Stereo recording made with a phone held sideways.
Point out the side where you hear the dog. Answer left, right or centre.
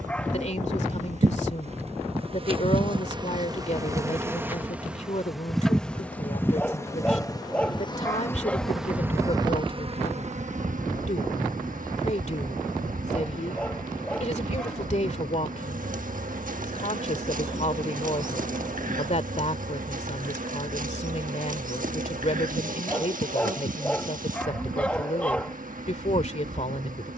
centre.